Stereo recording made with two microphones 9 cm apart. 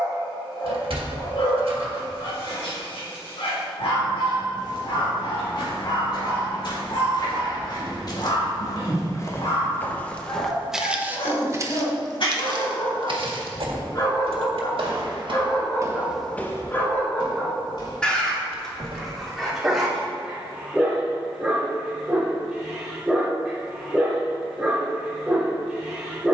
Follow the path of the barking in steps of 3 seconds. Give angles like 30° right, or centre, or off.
80° left, 80° left, 80° left, 70° left, 50° left, 30° left, centre, 10° right, 10° right.